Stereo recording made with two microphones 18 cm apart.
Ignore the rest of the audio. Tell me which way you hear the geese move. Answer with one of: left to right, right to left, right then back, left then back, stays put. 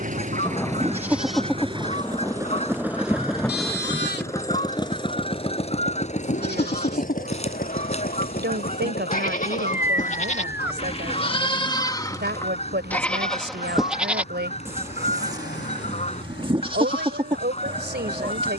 stays put.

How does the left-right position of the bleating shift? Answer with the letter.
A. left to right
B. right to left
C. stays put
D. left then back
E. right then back
D.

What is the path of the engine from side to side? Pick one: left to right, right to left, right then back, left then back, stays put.
right to left.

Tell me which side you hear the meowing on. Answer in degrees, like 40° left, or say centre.
10° right.